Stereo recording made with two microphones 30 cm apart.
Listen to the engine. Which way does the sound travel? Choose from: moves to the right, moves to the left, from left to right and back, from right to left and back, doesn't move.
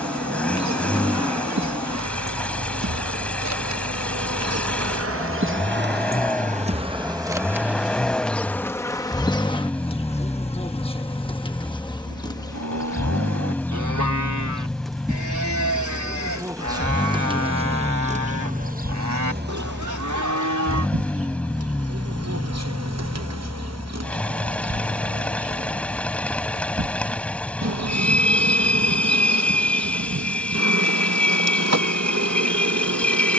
doesn't move.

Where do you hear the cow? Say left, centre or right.
right.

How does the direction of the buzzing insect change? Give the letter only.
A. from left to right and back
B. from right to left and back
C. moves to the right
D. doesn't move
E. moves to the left
B.